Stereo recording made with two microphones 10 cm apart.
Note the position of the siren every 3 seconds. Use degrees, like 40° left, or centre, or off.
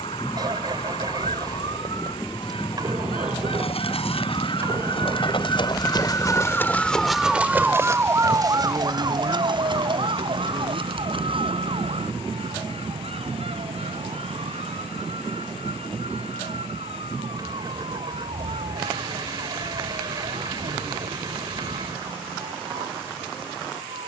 70° left, 50° left, 10° right, 60° right, 70° right, 80° right, 80° right, 80° right.